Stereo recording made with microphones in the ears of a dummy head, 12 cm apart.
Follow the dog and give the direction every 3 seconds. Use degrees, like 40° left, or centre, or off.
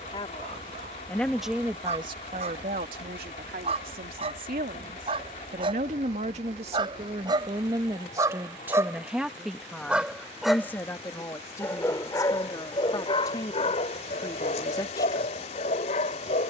50° right, 50° right, 30° right, centre, 40° left, 50° left.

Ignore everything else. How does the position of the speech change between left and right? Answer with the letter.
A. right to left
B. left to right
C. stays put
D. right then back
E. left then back
D.